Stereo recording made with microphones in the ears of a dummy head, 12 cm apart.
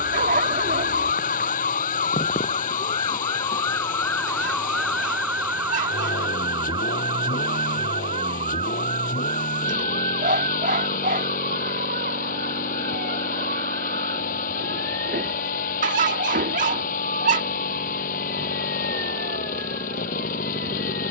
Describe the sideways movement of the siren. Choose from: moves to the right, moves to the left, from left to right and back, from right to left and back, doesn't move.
moves to the right.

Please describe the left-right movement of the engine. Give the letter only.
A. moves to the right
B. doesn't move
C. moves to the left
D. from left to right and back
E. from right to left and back
B.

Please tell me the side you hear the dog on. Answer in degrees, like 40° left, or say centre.
60° right.